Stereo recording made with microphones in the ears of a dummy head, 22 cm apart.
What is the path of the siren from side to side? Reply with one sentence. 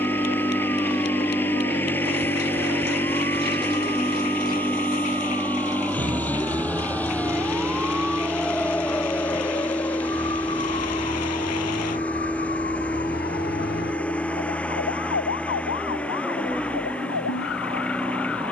In this clip you hear the siren travel towards the left.